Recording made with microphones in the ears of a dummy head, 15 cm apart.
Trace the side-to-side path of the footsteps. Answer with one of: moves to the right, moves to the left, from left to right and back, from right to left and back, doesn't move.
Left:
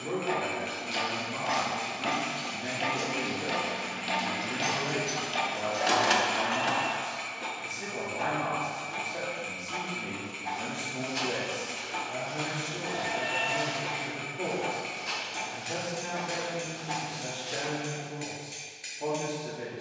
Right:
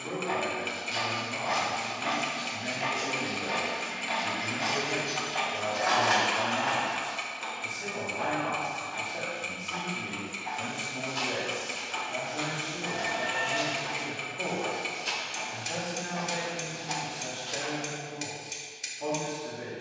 from left to right and back.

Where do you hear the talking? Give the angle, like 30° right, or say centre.
20° left.